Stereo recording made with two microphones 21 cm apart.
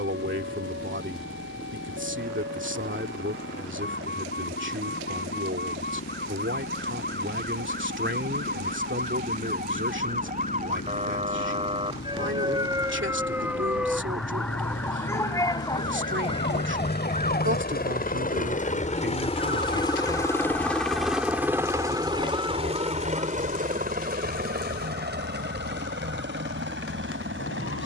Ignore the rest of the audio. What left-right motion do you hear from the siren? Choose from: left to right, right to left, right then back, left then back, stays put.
right to left.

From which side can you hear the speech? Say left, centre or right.
right.